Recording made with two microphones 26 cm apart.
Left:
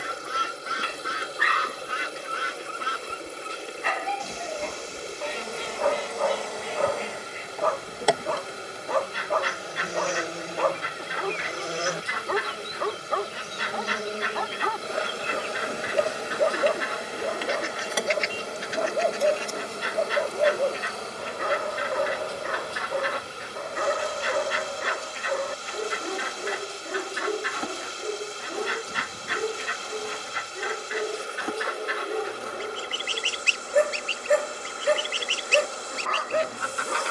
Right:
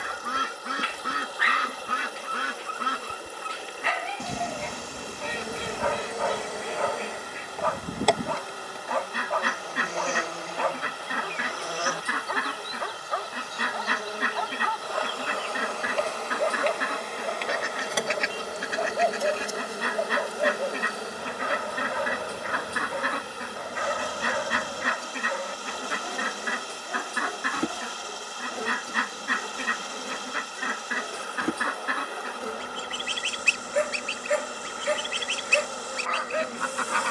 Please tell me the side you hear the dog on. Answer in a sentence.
In this clip you hear the dog on the left.